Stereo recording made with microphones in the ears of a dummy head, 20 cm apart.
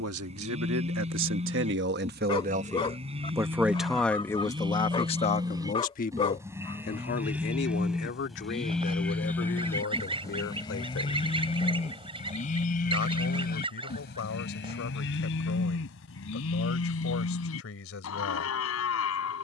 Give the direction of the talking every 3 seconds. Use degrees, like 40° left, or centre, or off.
60° right, 20° left, 50° left, 60° left, 60° left, 60° left, 60° left.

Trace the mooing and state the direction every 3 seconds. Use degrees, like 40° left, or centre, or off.
30° right, 20° right, 10° right, 20° left, 40° left, 60° left, 70° left.